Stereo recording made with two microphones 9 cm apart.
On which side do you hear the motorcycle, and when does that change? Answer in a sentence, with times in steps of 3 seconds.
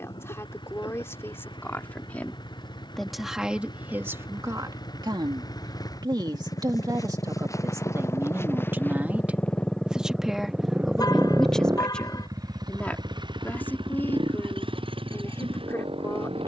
You can hear the motorcycle on the left from 0 s, in the centre from 9 s and on the right from 12 s.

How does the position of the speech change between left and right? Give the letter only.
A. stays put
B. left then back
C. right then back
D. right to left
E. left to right
C.